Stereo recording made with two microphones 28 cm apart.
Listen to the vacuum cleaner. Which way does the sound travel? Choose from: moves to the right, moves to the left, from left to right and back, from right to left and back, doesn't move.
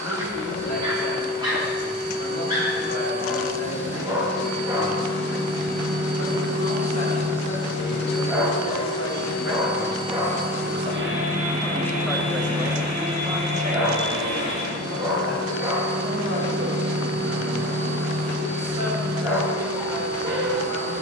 moves to the right.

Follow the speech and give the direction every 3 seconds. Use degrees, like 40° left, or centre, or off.
70° left, 70° left, 60° left, 30° left, 20° right, 50° right, 60° right.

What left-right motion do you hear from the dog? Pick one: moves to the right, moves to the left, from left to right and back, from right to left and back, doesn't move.
doesn't move.